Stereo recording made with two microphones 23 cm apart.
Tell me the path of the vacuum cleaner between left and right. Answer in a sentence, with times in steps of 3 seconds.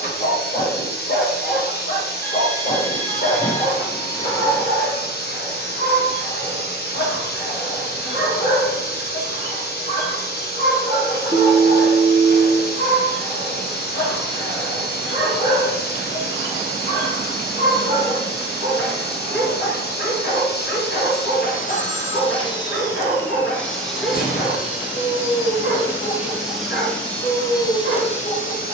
You can hear the vacuum cleaner on the left from 0 s, in the centre from 24 s and on the left from 27 s.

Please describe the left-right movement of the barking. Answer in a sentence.
In this clip you hear the barking stay put.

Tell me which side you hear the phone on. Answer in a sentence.
In this clip you hear the phone on the left.